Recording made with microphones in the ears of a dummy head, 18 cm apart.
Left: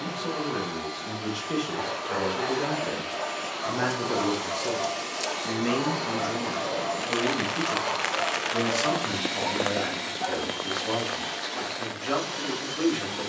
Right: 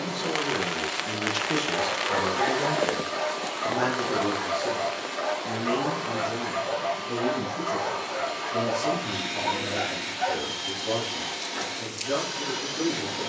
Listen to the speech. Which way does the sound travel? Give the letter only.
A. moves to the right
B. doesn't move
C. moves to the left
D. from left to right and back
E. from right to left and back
C.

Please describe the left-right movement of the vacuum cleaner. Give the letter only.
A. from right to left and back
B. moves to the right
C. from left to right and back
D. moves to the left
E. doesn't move
A.